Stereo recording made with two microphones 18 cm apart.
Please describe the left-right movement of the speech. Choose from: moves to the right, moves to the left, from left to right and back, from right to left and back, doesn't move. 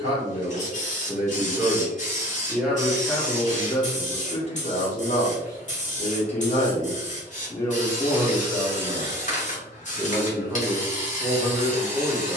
from right to left and back.